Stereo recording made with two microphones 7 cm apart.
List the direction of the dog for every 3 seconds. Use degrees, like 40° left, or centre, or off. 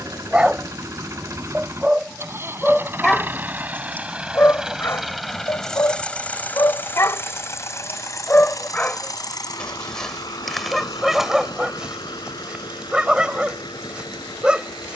10° right, 30° left, 30° left, centre, 10° right.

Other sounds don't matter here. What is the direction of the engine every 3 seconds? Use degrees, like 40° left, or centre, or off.
40° right, 10° right, 40° left, 70° left, 80° left.